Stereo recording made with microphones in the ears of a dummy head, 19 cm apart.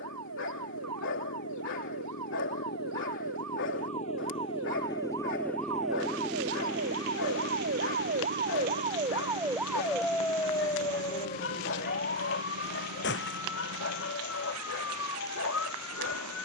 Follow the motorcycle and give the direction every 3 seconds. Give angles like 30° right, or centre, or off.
60° left, 20° left, 30° right, 60° right, 70° right, 80° right.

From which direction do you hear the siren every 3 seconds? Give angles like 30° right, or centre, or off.
80° right, 70° right, 50° right, 10° left, 50° left, 70° left.